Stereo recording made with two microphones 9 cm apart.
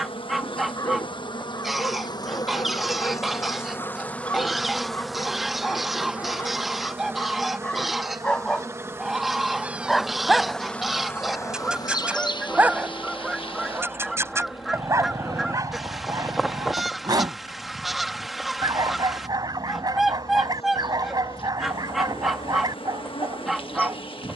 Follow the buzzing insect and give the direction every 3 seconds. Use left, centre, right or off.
left, centre, right, centre, left, left, left, left.